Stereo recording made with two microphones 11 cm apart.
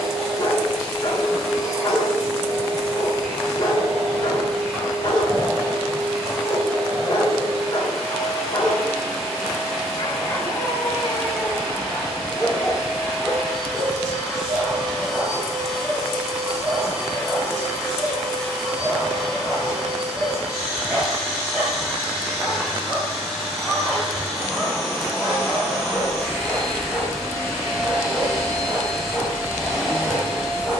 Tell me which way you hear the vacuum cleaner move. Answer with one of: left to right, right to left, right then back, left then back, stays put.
stays put.